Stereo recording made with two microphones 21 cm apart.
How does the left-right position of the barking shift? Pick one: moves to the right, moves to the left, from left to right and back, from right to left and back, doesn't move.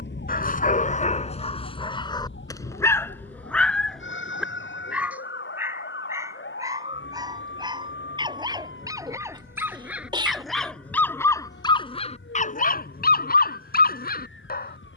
from left to right and back.